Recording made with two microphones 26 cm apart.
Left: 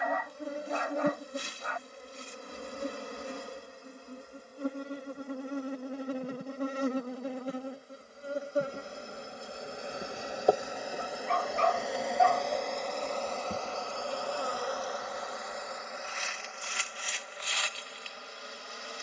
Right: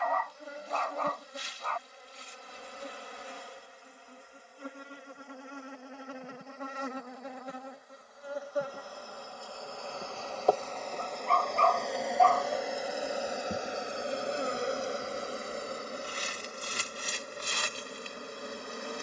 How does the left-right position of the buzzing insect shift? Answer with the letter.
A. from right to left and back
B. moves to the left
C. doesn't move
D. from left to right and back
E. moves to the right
E.